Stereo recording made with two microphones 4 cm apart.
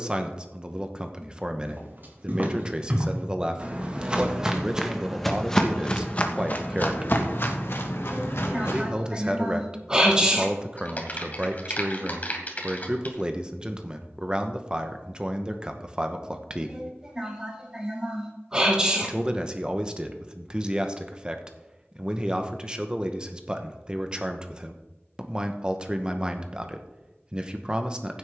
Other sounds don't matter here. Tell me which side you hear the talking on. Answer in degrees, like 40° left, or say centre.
20° right.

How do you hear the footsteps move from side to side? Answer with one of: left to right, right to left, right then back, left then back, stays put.
right to left.